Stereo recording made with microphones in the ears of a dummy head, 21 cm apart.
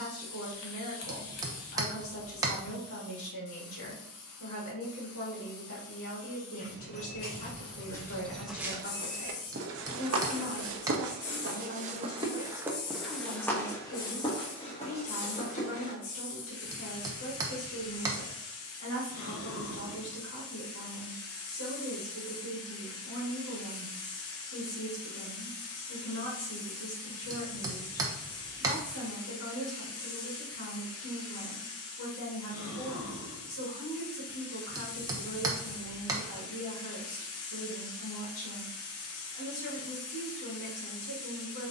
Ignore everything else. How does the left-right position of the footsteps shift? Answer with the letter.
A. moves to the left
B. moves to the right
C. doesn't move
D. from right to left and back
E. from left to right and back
E.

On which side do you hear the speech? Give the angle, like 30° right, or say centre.
70° left.